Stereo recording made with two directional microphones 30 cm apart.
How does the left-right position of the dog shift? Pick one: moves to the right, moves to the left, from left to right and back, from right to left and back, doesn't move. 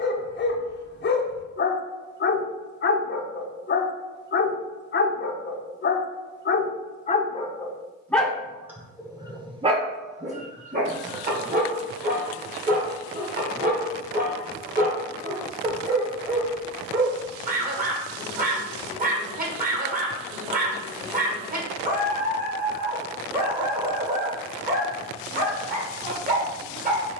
moves to the right.